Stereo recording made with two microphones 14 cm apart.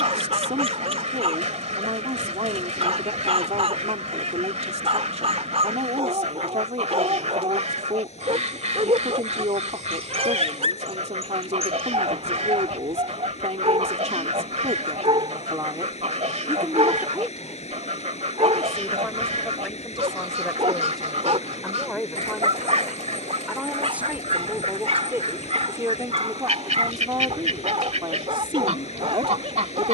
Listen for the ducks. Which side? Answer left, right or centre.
right.